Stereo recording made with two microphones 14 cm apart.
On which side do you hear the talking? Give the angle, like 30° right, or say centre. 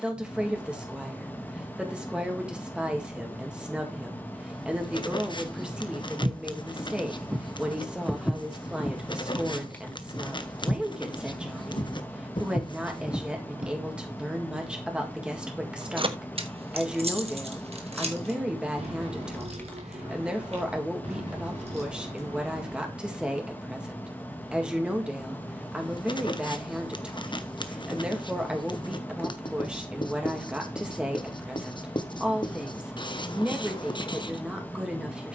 10° right.